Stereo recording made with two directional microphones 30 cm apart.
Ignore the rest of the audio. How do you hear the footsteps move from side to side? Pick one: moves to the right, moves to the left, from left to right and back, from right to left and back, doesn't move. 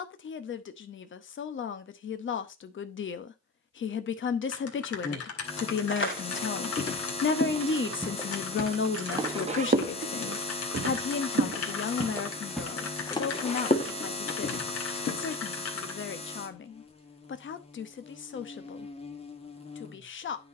from left to right and back.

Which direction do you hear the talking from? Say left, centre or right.
left.